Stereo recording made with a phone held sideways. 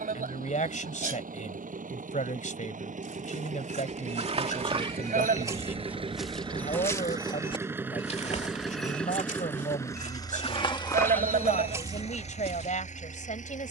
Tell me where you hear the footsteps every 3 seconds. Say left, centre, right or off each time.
off, right, left, left, right.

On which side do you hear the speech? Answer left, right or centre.
left.